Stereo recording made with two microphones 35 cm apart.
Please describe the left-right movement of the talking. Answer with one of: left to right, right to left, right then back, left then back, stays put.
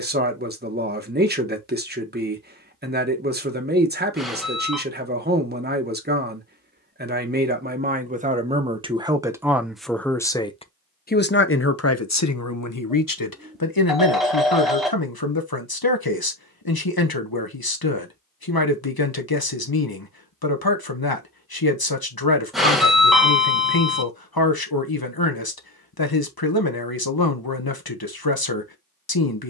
right to left.